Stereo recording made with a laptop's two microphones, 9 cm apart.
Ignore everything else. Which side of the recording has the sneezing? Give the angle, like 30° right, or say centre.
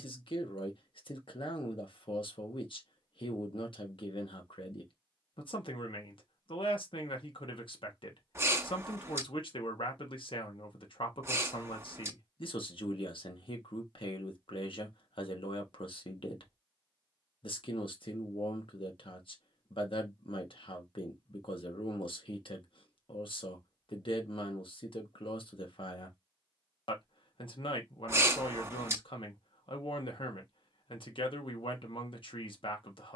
30° right.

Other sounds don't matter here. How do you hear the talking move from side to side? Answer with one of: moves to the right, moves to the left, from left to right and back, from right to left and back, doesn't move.
doesn't move.